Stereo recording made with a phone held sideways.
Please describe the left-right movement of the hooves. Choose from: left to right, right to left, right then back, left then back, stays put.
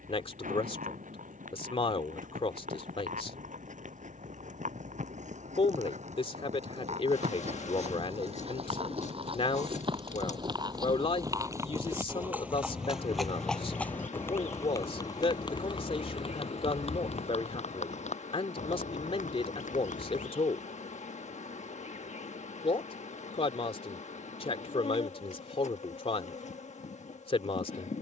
right to left.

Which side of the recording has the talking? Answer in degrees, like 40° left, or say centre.
40° left.